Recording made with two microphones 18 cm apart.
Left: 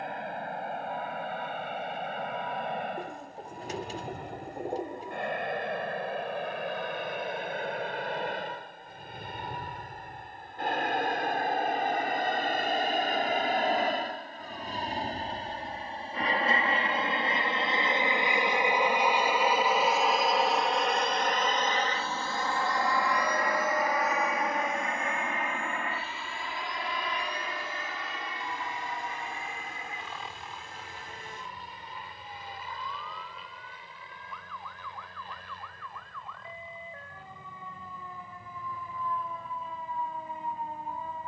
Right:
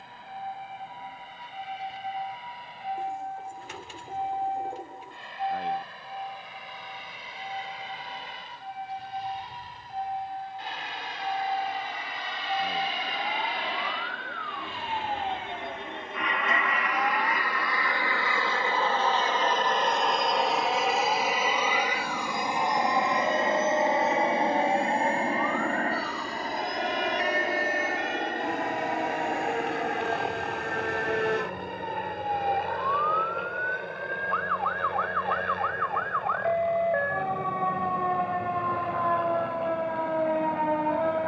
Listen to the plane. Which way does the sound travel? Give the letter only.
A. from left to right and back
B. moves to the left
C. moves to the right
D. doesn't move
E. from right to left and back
C.